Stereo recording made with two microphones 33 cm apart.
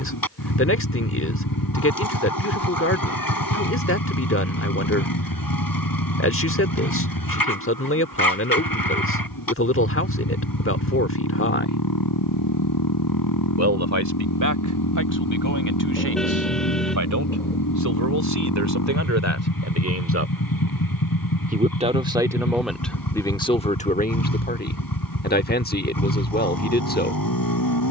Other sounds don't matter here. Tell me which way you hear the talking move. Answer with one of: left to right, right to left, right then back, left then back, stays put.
right then back.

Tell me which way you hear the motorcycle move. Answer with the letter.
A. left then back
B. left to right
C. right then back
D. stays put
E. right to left
D.